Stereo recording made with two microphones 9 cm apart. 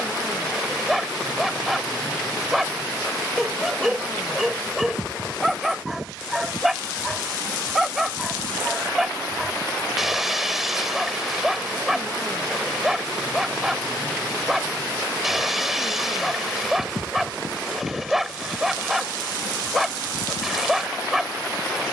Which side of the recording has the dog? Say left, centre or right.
centre.